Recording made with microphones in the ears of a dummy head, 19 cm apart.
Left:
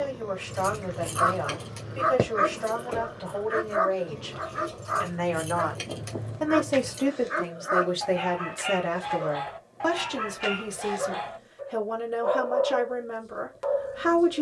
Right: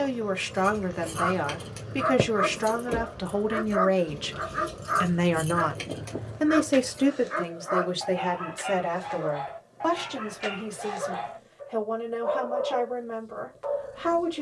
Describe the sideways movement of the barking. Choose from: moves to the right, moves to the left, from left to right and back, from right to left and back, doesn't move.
from left to right and back.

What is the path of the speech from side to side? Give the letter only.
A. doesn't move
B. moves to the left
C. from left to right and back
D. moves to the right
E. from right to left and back
B.